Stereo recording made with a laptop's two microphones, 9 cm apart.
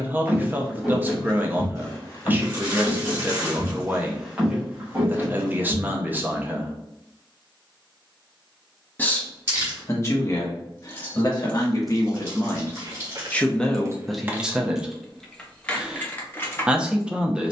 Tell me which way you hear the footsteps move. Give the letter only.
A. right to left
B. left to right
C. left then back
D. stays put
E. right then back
C.